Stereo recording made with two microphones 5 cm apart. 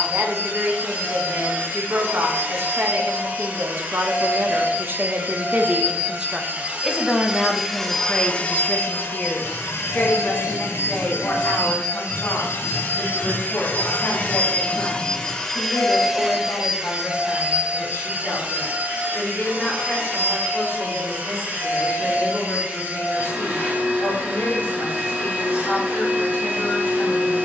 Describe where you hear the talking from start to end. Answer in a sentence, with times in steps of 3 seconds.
In this clip you hear the talking on the right from 0 s, in the centre from 6 s and on the left from 9 s.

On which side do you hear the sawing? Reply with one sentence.
In this clip you hear the sawing on the right.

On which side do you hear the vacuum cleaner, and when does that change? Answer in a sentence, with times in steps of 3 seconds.
You can hear the vacuum cleaner on the right from 0 s, in the centre from 6 s, on the left from 9 s, in the centre from 15 s and on the right from 18 s.